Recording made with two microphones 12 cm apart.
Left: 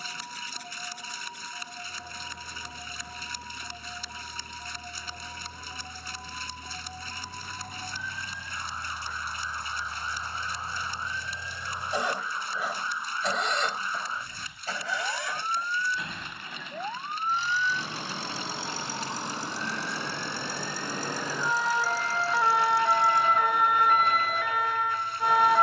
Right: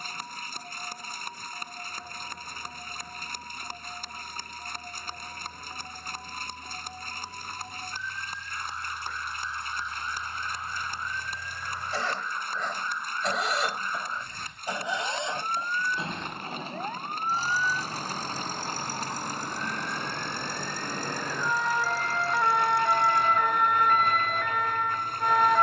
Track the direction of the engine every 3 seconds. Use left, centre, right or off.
left, left, left, left, centre, right, right, right, right.